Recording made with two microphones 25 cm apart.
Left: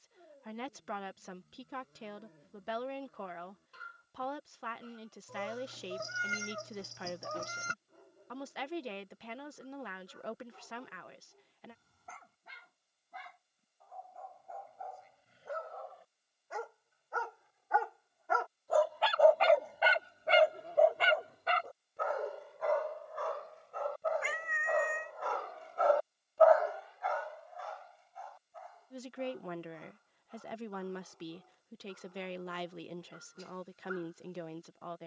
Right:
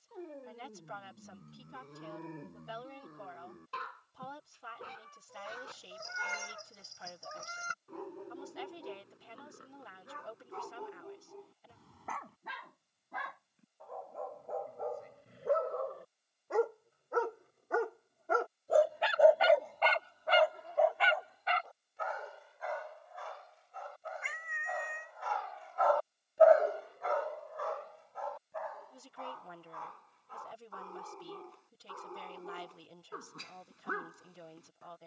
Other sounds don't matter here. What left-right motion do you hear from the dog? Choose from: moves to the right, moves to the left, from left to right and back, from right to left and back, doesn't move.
from right to left and back.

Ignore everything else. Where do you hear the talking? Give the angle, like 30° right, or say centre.
70° left.